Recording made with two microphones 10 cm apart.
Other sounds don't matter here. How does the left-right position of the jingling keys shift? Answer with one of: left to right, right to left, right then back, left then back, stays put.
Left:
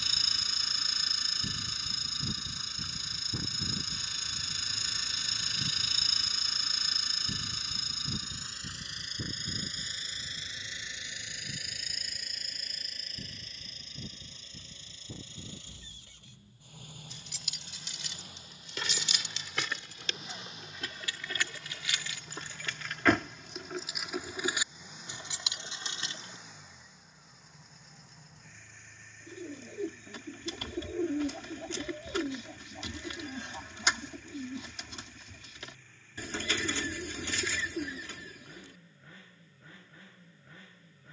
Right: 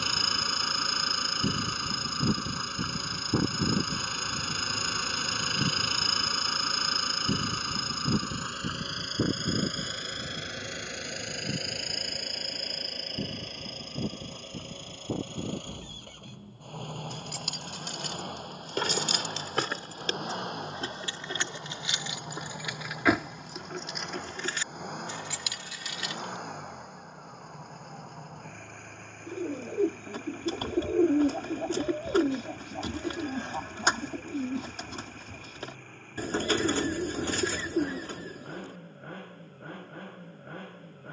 right to left.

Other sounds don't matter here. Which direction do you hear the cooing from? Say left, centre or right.
right.